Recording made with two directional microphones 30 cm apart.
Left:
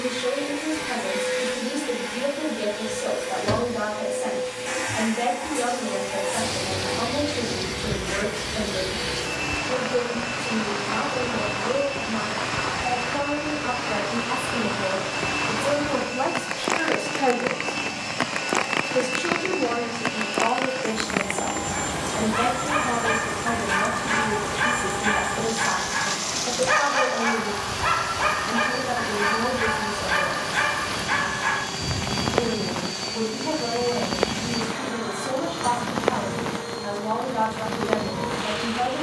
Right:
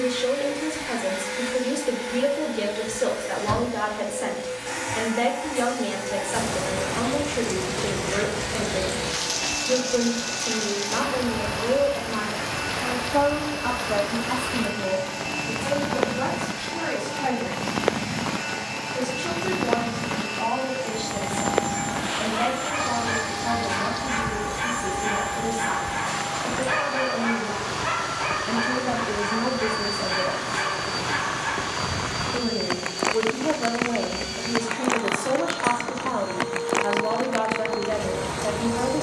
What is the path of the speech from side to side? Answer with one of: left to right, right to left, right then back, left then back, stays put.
left then back.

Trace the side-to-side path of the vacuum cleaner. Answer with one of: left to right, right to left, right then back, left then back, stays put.
stays put.